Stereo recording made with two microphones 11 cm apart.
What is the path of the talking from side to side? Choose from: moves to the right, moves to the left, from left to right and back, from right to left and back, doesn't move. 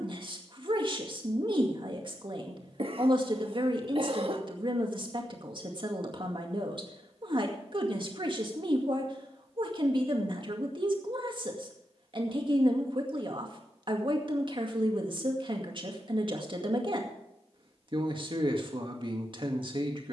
doesn't move.